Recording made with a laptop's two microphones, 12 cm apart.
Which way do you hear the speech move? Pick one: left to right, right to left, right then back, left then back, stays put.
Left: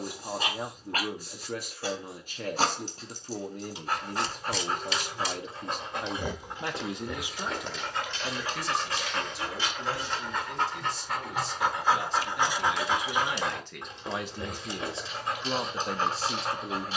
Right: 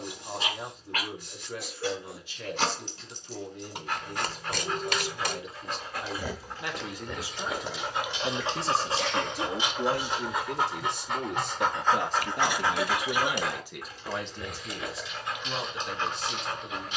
right then back.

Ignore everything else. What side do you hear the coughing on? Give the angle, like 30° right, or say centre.
70° right.